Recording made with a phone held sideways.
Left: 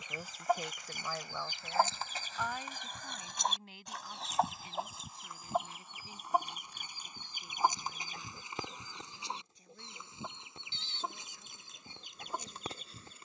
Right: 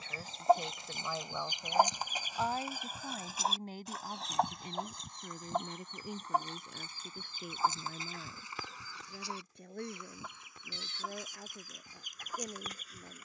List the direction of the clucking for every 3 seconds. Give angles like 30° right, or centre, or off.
20° right, centre, 20° left, 20° left, 30° left.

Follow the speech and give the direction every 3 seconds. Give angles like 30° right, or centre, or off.
10° right, 50° right, 60° right, 60° right, 70° right.